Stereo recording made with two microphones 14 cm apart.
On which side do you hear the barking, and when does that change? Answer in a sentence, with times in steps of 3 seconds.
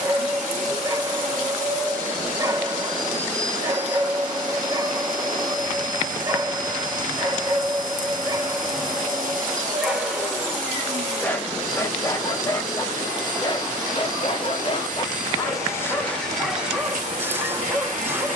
In this clip you hear the barking on the right from 0 s, in the centre from 9 s, on the left from 12 s and in the centre from 15 s.